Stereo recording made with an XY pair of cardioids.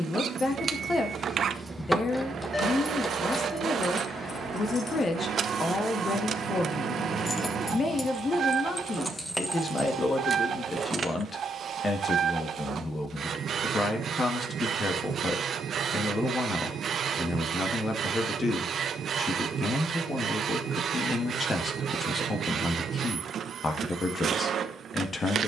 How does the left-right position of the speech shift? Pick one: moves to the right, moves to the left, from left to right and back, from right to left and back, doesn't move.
doesn't move.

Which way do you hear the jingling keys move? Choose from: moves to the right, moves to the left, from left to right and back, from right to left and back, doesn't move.
from right to left and back.